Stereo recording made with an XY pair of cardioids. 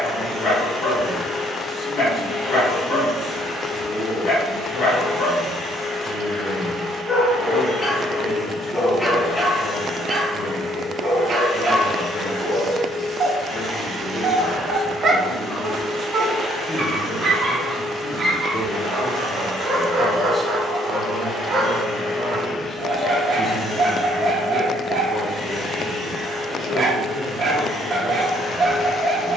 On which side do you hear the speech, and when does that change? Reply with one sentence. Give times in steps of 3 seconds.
In this clip you hear the speech on the left from 0 s, in the centre from 18 s and on the left from 24 s.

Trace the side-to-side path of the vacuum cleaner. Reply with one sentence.
In this clip you hear the vacuum cleaner stay put.